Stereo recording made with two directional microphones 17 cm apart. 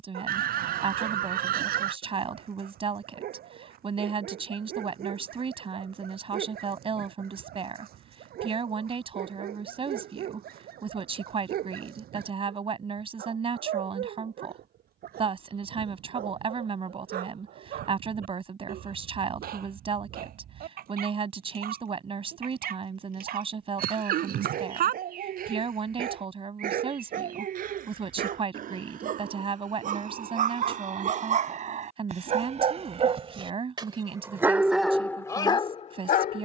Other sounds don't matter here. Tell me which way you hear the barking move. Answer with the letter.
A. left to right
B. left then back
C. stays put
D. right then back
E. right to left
E.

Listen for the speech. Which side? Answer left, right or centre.
right.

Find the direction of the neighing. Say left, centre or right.
right.